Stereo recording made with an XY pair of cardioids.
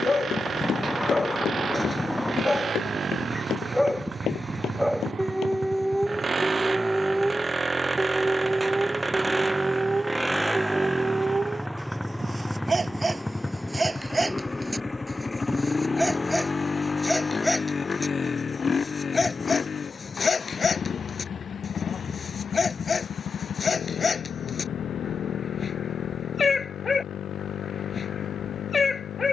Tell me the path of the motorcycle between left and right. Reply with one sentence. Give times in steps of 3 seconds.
In this clip you hear the motorcycle on the right from 0 s, in the centre from 9 s and on the left from 15 s.